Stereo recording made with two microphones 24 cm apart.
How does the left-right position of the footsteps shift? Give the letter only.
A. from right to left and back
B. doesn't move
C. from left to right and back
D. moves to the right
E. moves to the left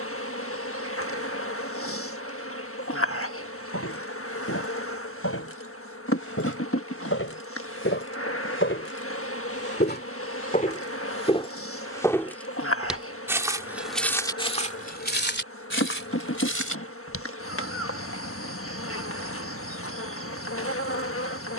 C.